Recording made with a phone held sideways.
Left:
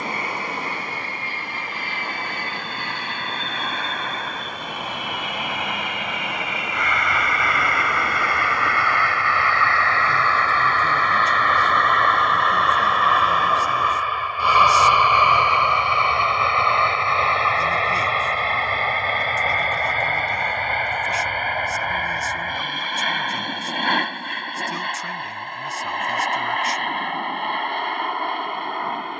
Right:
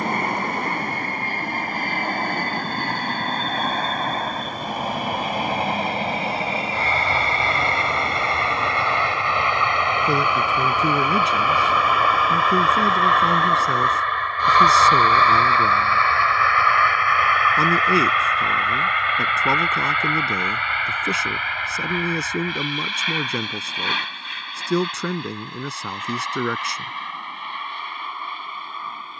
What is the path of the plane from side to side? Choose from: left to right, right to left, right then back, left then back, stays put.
right to left.